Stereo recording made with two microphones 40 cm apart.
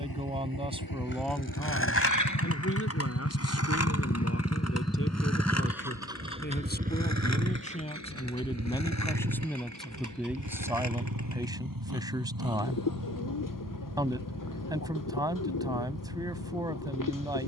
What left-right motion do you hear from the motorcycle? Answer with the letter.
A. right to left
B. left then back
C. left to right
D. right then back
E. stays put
C.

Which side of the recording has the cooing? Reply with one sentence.
In this clip you hear the cooing on the left.